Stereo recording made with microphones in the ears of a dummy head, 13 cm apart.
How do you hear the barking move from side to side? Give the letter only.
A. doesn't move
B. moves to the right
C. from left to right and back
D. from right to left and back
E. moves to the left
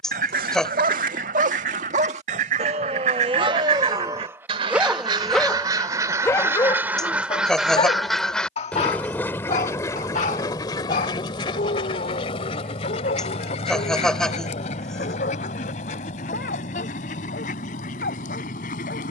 E.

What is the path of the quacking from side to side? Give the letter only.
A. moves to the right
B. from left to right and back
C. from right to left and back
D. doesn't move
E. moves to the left
E.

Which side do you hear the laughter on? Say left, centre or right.
centre.